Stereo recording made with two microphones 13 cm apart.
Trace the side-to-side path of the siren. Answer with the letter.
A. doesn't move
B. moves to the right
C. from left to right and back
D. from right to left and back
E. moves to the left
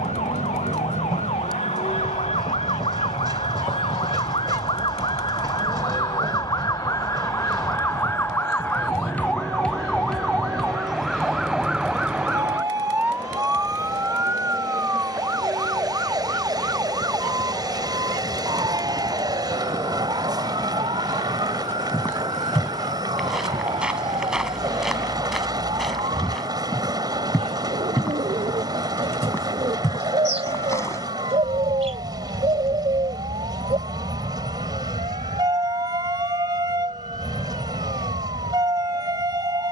B.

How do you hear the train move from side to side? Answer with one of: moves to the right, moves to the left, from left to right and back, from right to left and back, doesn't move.
doesn't move.